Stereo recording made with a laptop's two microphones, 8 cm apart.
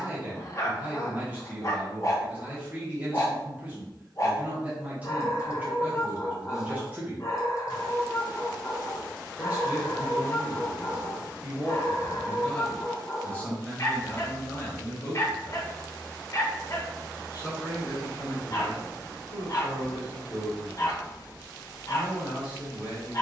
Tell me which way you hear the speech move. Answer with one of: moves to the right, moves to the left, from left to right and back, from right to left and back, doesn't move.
moves to the left.